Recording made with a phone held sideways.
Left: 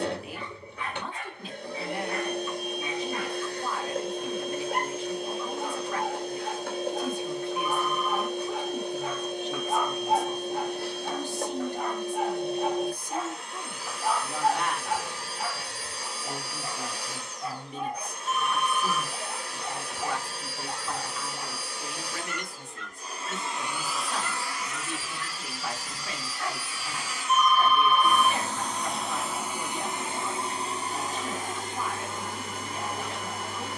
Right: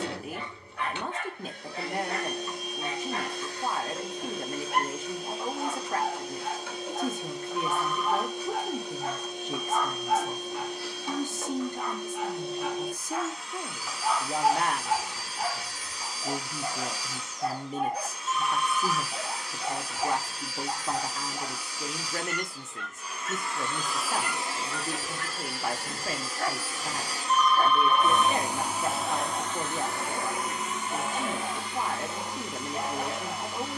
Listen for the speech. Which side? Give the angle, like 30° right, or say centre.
50° right.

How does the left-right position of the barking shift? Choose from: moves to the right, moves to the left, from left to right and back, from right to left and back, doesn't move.
from right to left and back.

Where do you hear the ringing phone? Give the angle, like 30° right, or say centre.
10° left.